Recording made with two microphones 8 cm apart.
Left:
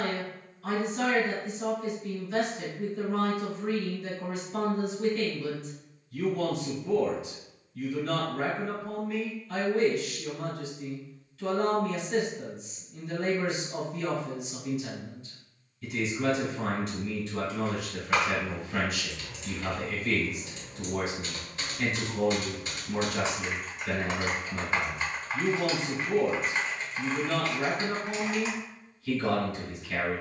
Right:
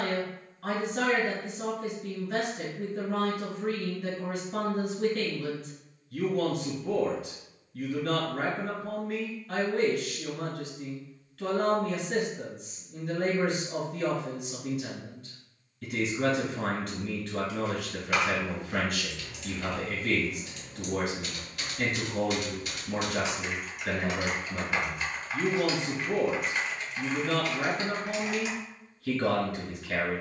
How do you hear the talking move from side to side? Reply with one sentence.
You can hear the talking stay in one place.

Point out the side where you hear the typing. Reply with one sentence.
You can hear the typing on the left.